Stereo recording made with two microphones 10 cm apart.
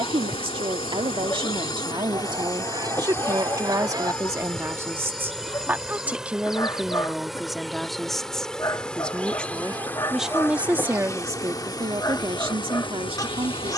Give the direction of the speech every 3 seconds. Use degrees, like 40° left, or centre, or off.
50° right, 30° right, centre, 10° right, 60° right.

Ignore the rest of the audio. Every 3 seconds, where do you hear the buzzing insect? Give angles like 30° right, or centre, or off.
50° left, 10° left, centre, 20° left, 50° left.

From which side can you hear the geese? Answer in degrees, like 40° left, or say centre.
40° right.